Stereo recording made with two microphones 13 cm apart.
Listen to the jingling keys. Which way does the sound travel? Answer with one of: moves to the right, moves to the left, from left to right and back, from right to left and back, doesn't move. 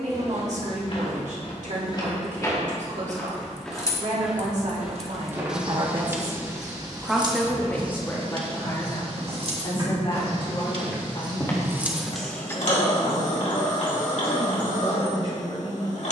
from left to right and back.